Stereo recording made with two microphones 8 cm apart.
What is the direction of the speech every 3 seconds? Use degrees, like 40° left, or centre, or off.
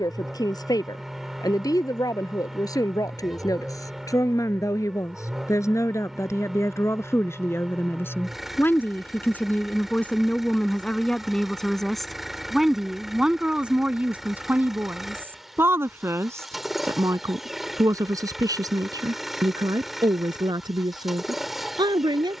50° left, 40° left, 30° left, 10° left, 10° right, 40° right, 50° right, 60° right.